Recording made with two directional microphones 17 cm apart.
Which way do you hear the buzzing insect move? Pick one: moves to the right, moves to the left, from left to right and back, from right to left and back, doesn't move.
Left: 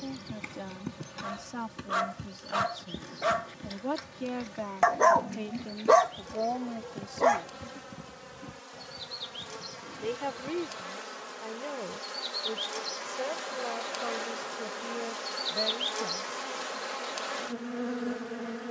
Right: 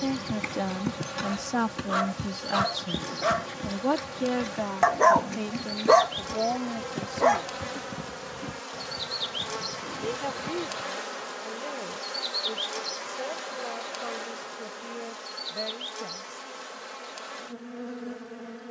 moves to the left.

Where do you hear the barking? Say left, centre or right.
centre.